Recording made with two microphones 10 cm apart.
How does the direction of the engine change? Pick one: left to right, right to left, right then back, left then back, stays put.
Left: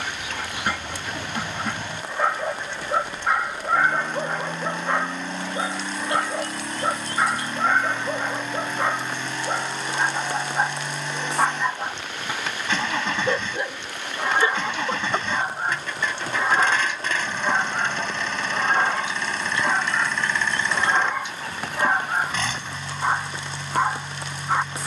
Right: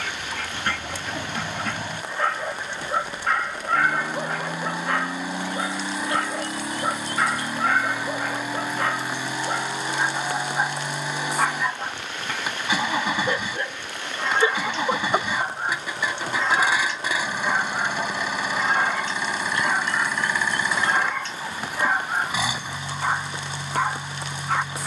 stays put.